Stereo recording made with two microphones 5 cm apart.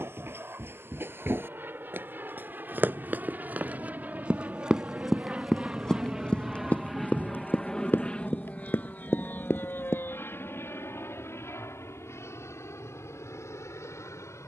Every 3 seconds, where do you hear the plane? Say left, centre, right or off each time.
right, right, centre, left, left.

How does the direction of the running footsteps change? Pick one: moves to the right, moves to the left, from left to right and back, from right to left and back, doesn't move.
moves to the left.